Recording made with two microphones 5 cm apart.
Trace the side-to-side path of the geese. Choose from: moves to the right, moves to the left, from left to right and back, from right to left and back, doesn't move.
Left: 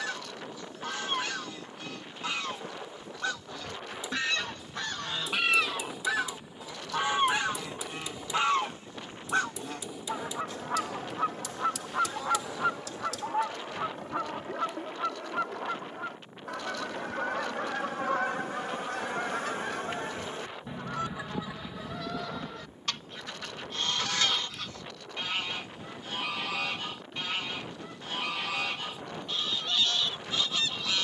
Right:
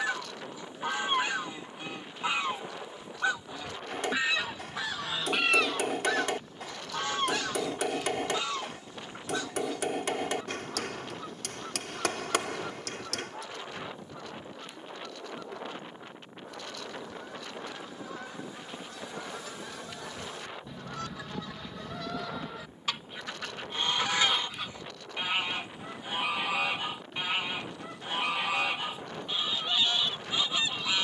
from right to left and back.